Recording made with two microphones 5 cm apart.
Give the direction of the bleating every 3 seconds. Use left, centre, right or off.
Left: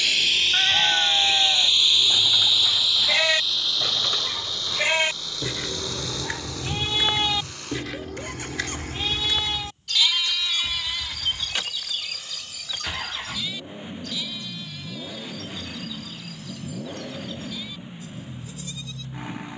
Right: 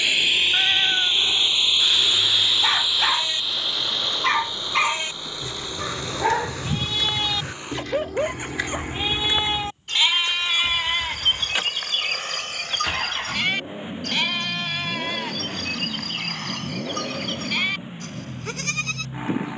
left, left, centre, right, right, right, right.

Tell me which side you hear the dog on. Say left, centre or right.
right.